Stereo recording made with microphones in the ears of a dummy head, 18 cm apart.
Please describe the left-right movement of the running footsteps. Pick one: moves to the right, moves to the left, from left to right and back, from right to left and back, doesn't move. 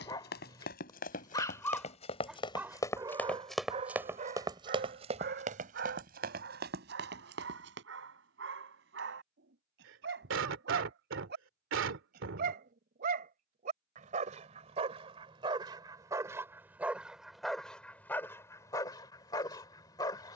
moves to the right.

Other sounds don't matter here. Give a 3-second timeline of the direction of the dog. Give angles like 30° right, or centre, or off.
10° left, 40° right, 60° right, 60° right, 40° right, 10° right, 20° left.